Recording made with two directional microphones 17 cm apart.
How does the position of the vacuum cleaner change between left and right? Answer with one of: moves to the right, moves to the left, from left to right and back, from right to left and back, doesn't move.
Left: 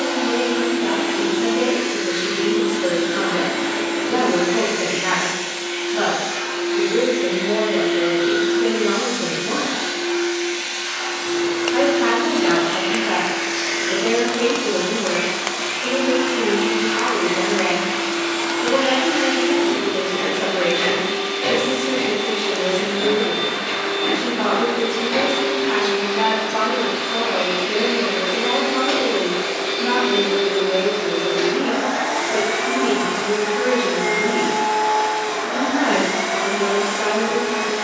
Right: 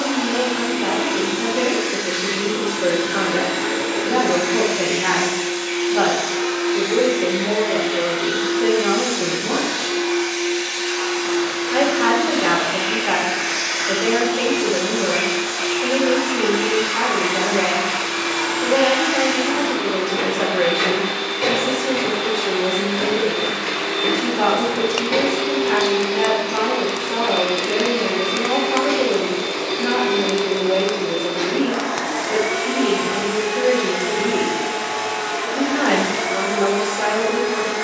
moves to the left.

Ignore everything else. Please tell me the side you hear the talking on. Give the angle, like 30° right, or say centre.
40° right.